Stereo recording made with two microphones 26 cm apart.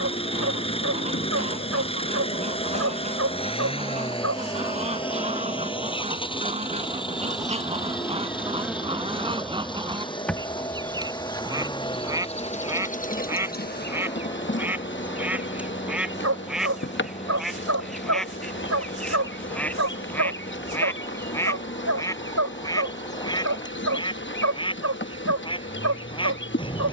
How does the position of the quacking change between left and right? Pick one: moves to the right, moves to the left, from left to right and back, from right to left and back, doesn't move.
moves to the left.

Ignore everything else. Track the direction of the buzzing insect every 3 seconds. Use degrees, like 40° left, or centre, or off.
50° left, 10° left, 10° right, 10° left, 40° left, 50° left, 50° left, 50° left, 50° left.